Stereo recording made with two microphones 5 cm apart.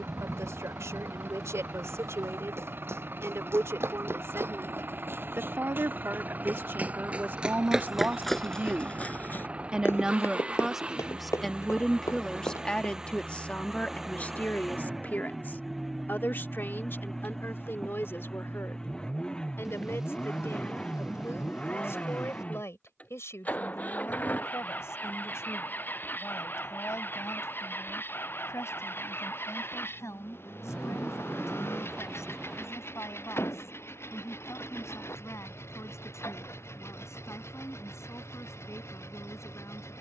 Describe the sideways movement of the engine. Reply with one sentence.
In this clip you hear the engine move to the left.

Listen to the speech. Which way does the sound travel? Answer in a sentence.
You can hear the speech move to the left.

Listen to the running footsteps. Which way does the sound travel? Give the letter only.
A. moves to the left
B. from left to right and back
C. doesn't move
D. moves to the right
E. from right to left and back
A.